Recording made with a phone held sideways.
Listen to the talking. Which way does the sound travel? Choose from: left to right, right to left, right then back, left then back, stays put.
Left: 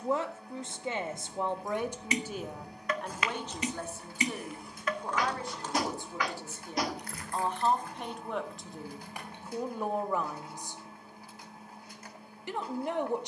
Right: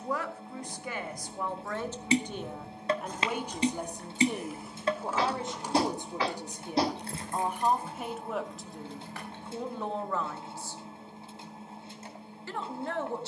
right then back.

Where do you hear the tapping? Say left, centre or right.
right.